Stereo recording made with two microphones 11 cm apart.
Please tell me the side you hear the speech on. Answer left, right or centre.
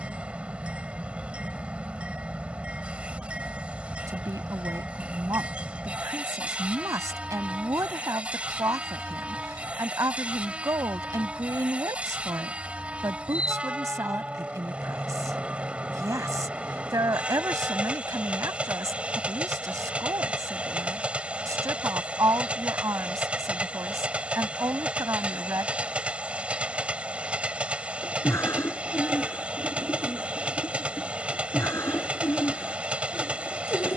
right.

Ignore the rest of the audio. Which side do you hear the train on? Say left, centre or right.
centre.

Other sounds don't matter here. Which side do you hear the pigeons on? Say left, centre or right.
left.